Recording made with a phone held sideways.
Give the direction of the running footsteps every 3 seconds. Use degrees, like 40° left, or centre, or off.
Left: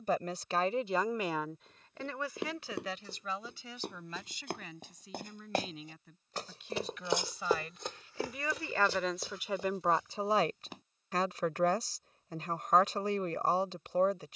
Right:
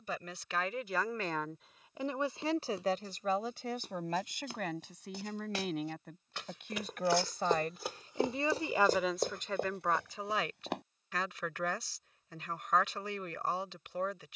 70° left, 60° left, centre, 60° right, off.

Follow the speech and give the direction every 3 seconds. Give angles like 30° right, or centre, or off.
centre, 60° right, 40° right, 30° left, 40° left.